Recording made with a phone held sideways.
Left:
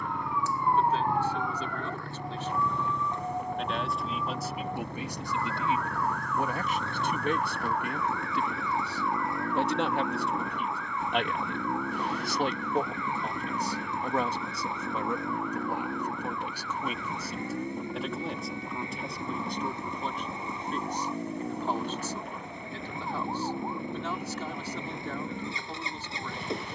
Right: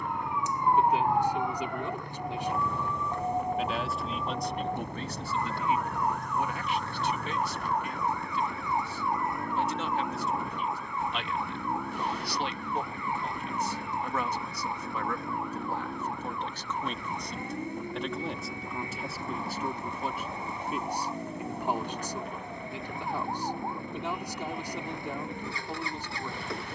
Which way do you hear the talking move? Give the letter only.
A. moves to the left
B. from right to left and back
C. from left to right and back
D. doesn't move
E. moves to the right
B.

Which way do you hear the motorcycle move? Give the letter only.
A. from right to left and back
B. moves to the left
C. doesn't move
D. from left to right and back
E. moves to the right
C.